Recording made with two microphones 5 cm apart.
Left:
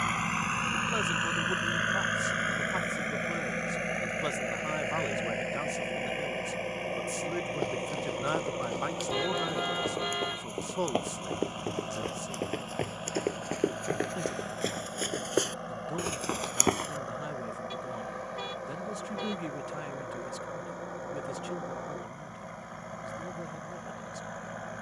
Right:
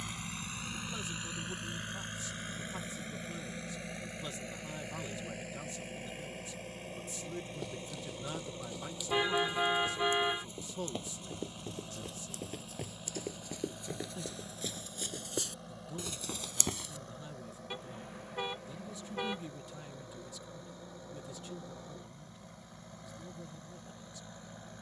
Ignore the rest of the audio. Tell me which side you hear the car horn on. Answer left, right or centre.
centre.